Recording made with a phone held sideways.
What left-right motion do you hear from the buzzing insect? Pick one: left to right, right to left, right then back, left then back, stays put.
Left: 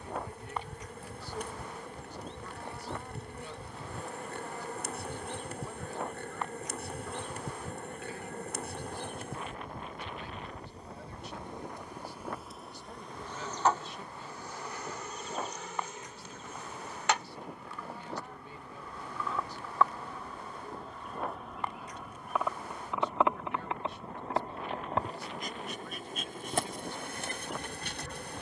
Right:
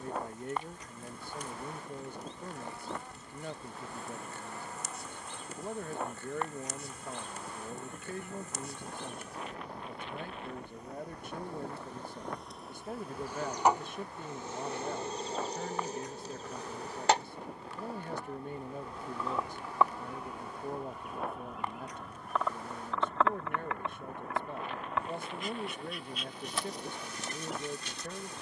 right then back.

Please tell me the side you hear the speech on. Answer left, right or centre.
right.